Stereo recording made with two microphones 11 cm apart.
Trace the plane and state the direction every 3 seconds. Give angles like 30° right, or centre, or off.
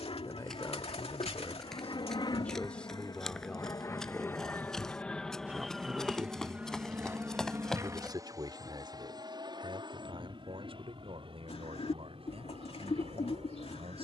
50° left, 20° left, 20° right, 40° right, 50° right.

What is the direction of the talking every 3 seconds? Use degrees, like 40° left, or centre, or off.
20° left, centre, 40° right, 60° right, 70° right.